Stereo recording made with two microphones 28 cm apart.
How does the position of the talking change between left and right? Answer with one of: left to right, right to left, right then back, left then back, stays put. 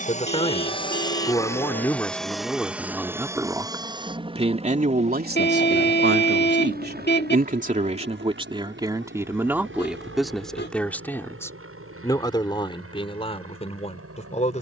right then back.